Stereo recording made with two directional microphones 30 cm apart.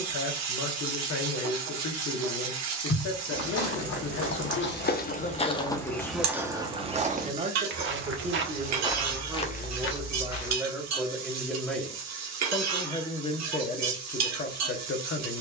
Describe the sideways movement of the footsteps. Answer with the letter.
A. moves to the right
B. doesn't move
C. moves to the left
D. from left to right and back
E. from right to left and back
D.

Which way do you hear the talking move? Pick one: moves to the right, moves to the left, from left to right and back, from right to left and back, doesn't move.
from left to right and back.